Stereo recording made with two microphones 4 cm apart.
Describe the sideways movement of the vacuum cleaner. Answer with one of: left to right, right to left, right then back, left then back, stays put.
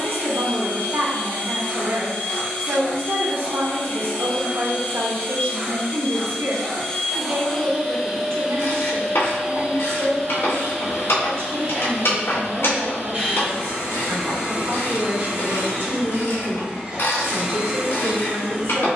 left to right.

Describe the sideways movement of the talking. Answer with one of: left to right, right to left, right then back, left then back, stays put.
stays put.